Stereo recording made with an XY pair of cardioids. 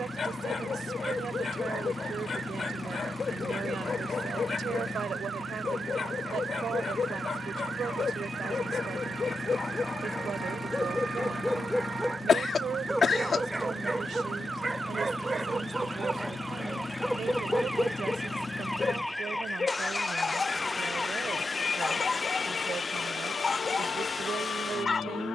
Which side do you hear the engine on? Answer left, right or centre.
left.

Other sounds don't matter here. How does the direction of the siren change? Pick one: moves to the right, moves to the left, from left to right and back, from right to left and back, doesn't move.
moves to the left.